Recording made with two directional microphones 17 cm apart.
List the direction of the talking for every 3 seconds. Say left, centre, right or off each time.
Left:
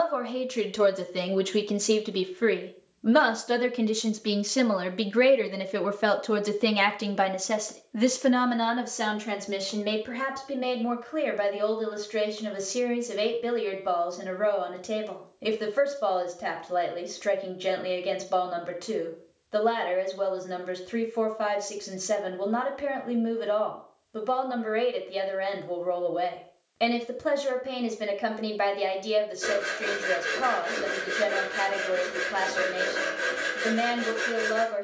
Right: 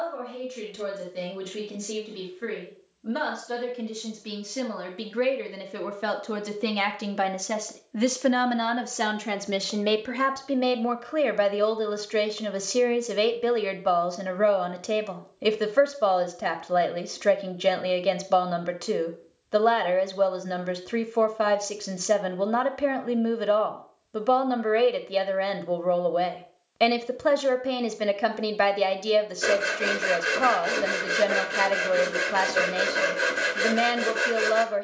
left, left, centre, right, right, right, right, right, right, right, right, right.